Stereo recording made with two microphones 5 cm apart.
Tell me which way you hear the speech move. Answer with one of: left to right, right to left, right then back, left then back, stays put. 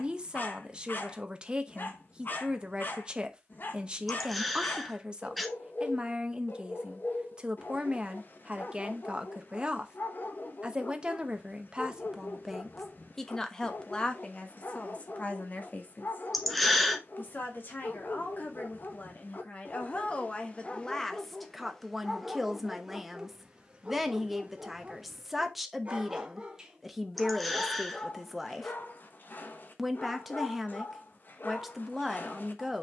left then back.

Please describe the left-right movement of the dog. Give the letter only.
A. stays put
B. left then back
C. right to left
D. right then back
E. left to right
D.